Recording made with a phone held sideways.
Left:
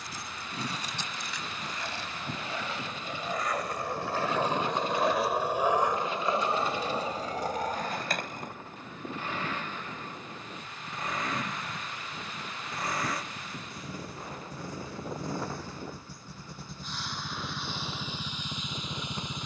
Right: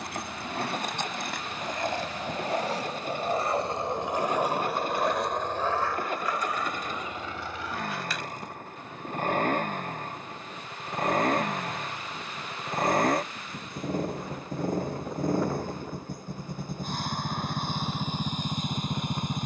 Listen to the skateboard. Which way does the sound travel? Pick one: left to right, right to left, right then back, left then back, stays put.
right to left.